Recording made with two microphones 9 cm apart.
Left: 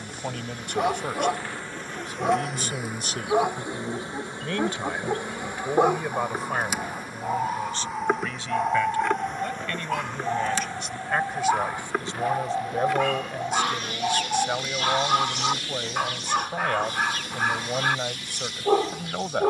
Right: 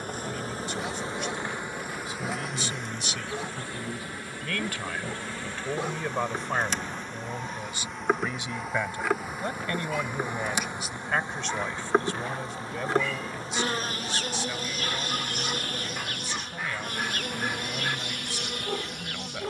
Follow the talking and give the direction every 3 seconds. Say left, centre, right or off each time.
left, left, centre, centre, left, left, left.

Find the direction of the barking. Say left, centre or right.
left.